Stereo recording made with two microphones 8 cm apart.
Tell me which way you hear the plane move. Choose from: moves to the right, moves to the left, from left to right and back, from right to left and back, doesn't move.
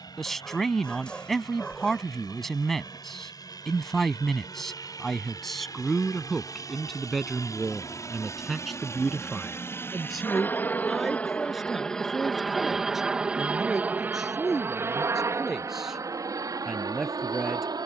moves to the right.